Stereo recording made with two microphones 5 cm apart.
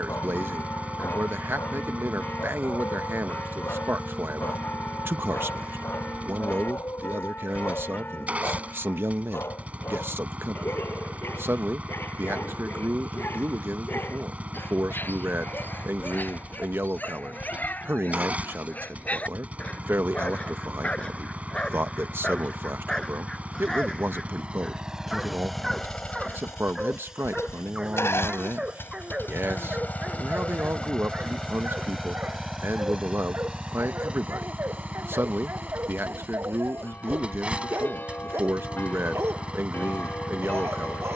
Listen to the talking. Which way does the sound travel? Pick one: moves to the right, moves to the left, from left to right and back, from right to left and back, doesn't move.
doesn't move.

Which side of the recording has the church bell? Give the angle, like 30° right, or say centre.
40° left.